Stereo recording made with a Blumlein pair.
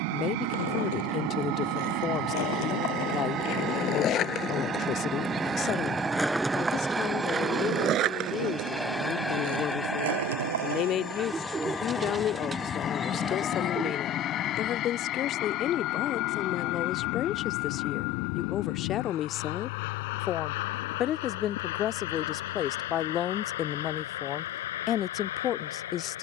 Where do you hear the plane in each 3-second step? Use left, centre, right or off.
right, right, centre, centre, left, left, left, left, left.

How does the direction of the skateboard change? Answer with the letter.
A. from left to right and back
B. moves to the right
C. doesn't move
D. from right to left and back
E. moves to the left
B.